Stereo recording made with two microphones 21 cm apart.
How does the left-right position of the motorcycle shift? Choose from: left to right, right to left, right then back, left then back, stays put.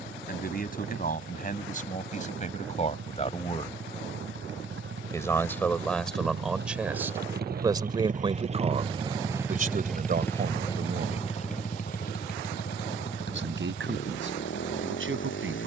right to left.